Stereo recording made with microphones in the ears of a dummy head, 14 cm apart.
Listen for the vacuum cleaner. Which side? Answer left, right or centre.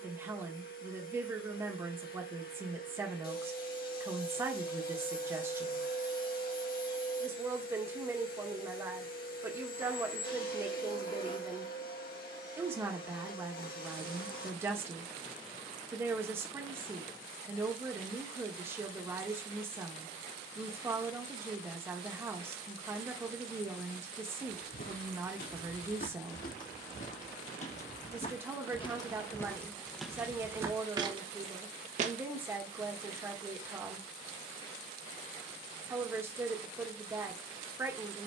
left.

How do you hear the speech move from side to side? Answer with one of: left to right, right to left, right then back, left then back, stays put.
stays put.